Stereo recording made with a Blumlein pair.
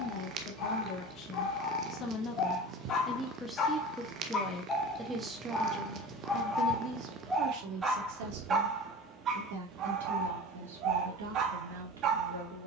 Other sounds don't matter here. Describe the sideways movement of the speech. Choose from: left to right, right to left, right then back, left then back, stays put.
left to right.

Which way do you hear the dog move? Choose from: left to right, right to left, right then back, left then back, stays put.
left to right.